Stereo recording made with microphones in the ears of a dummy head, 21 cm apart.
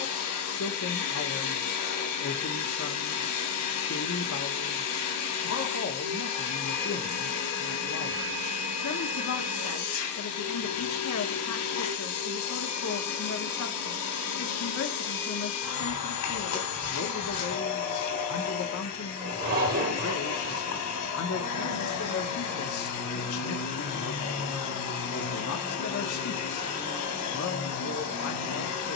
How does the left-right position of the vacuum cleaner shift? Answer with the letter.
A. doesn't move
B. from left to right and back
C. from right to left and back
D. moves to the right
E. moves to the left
A.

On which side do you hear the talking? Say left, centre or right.
left.